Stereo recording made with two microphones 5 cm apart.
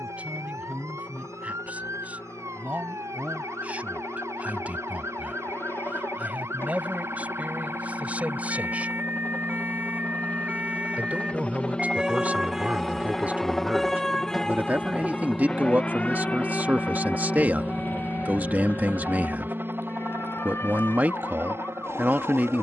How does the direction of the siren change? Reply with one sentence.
You can hear the siren travel towards the left.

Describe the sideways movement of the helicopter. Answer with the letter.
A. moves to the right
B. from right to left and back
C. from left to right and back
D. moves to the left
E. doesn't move
A.